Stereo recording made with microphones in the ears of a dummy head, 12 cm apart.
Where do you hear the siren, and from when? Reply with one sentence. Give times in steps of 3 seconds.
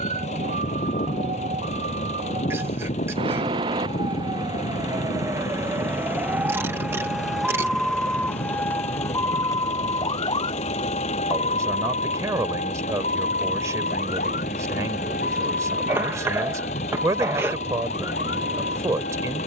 In this clip you hear the siren on the right from 0 s, in the centre from 6 s and on the left from 9 s.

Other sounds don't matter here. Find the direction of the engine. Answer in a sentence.
In this clip you hear the engine on the left.